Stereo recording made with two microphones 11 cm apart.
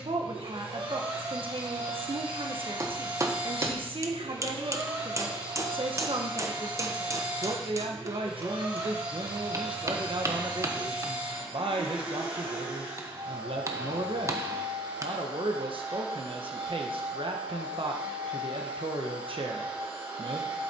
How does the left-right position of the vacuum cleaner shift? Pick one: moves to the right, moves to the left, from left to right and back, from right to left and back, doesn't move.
doesn't move.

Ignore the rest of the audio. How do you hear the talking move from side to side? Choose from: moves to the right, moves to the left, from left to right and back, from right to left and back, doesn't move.
doesn't move.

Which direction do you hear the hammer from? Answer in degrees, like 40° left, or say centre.
30° right.